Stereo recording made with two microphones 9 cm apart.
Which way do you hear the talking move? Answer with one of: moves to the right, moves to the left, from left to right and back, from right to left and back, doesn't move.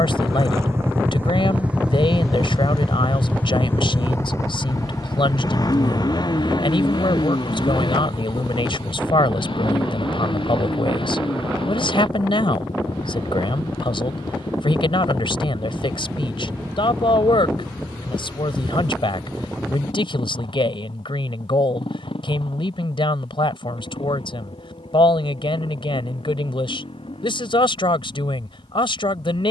doesn't move.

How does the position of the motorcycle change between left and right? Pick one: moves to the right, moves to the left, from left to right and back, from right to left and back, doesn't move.
moves to the left.